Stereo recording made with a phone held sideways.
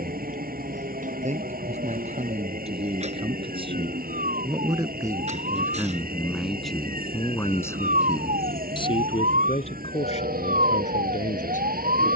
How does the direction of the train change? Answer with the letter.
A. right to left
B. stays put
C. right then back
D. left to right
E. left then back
B.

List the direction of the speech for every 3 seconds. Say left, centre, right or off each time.
right, right, centre, left.